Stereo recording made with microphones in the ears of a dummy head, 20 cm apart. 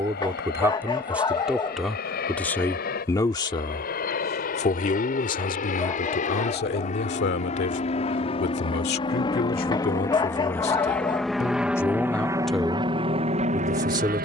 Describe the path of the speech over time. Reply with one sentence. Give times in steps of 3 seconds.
You can hear the speech in the centre from 0 s, on the left from 3 s and in the centre from 12 s.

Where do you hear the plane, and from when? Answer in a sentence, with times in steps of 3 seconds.
In this clip you hear the plane on the left from 0 s, in the centre from 9 s and on the right from 12 s.